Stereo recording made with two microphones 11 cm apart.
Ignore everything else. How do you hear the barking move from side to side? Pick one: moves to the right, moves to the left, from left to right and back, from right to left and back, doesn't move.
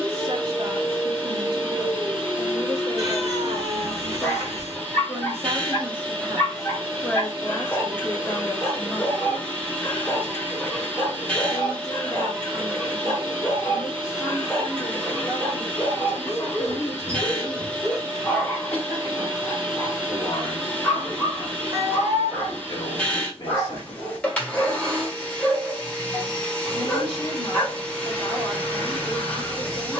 doesn't move.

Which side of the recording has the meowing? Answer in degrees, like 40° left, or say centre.
30° right.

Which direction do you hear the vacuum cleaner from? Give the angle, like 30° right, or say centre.
10° left.